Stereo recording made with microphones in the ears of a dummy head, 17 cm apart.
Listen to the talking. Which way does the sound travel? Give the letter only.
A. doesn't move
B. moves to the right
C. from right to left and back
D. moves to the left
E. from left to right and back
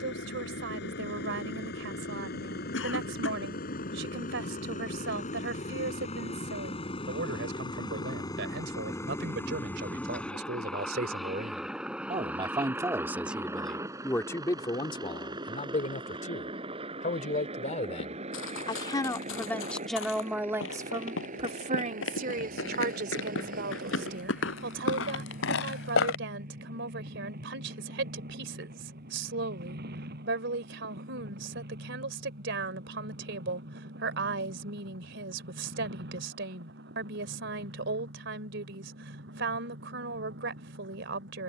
C.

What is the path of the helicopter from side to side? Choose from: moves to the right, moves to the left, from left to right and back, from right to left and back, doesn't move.
moves to the right.